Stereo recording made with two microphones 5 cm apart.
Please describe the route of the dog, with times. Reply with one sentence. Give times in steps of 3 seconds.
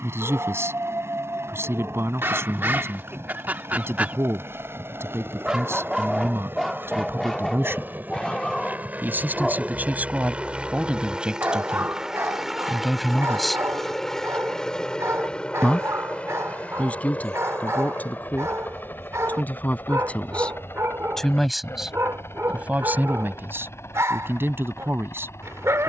You can hear the dog on the right from 0 s, in the centre from 6 s and on the right from 9 s.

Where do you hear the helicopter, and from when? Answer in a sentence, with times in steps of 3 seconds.
In this clip you hear the helicopter on the right from 0 s, in the centre from 12 s and on the left from 15 s.